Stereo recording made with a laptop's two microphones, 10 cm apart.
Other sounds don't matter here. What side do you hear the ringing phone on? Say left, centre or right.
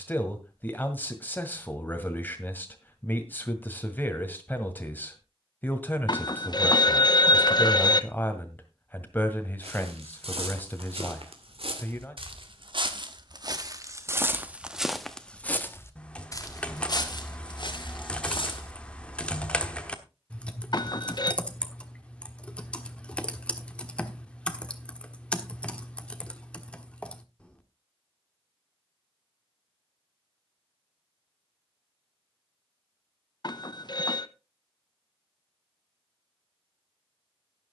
left.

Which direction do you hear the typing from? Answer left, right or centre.
centre.